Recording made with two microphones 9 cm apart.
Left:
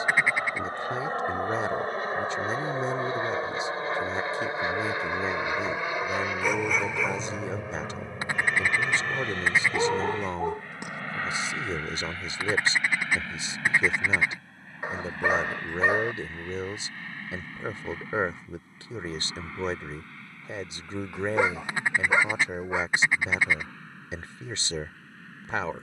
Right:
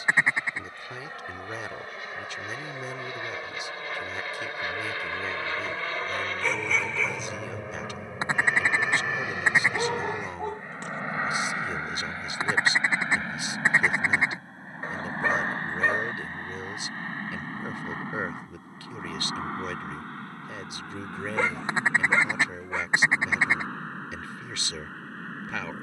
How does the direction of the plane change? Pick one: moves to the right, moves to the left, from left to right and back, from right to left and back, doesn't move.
moves to the right.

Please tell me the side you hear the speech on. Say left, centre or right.
left.